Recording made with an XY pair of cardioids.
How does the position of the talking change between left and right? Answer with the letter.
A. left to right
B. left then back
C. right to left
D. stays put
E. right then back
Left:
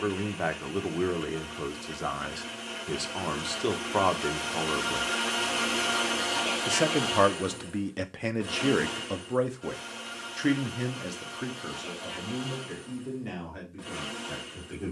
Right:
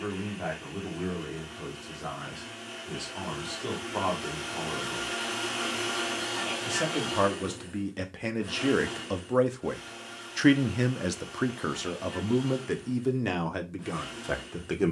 A.